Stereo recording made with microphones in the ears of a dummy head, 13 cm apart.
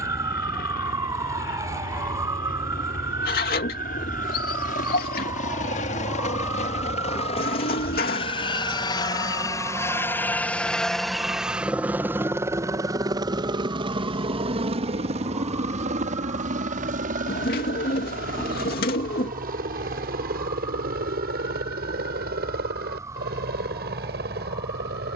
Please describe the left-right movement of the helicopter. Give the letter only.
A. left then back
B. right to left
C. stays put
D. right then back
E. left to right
E.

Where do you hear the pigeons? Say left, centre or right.
left.